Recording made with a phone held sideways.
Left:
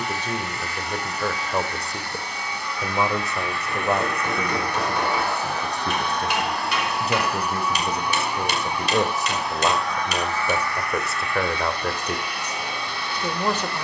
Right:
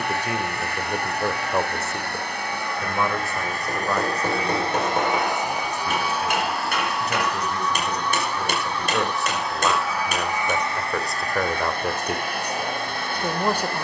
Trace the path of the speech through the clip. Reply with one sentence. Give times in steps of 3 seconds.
You can hear the speech in the centre from 0 s, on the left from 3 s and in the centre from 9 s.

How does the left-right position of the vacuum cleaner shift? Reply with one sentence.
You can hear the vacuum cleaner go left and come back.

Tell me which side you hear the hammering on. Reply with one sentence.
You can hear the hammering on the right.